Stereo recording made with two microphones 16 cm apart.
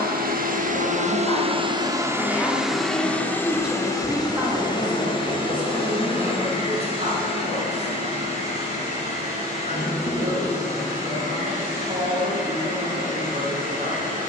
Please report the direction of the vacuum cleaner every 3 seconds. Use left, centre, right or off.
right, left, left, left, left.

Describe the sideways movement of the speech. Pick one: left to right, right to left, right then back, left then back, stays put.
left to right.